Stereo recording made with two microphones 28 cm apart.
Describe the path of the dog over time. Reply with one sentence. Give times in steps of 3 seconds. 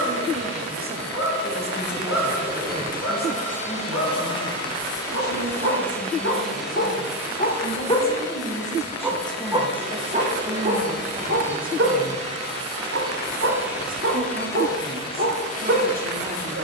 In this clip you hear the dog on the left from 0 s and on the right from 9 s.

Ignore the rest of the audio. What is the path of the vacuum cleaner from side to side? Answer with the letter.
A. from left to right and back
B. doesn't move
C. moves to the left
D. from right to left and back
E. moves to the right
A.